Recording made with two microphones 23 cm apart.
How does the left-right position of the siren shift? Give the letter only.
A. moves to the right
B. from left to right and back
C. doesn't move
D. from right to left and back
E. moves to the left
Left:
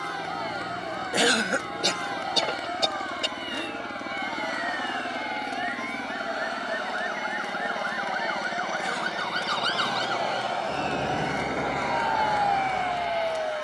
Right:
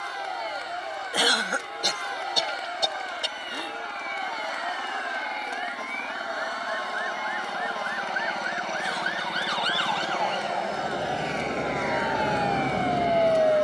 A.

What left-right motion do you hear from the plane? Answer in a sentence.
You can hear the plane travel towards the right.